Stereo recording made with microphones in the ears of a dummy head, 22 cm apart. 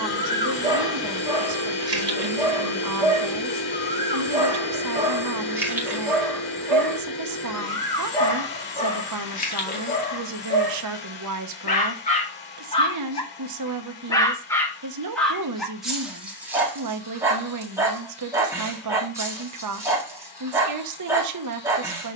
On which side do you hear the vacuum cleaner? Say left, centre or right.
left.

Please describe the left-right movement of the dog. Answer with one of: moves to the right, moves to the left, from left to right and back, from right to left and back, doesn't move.
from right to left and back.